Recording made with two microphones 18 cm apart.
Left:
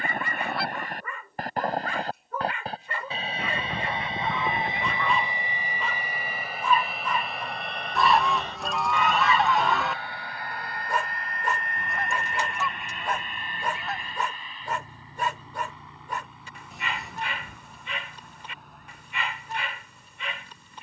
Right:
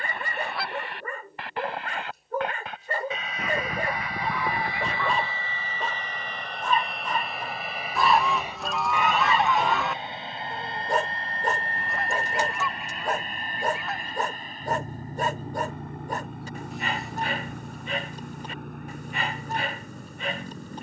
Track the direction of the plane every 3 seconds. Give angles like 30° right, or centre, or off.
40° left, 20° left, centre, 20° right, 40° right, 50° right, 50° right.